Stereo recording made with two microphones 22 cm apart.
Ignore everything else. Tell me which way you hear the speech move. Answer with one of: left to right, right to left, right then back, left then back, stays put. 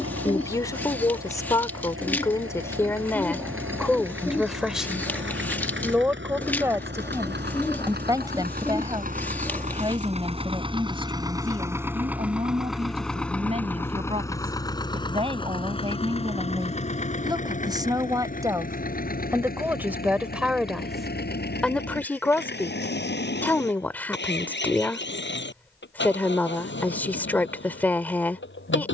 right then back.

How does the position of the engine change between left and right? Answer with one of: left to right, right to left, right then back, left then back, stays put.
right to left.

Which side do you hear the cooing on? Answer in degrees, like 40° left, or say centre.
10° left.